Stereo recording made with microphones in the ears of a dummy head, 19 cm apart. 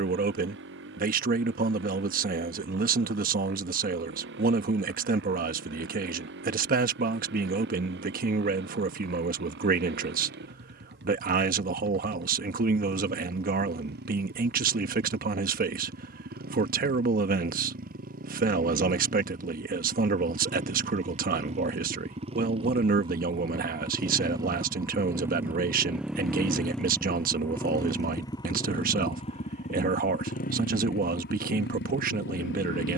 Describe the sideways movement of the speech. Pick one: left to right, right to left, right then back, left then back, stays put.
stays put.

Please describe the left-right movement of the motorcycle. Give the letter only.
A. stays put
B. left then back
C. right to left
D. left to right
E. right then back
C.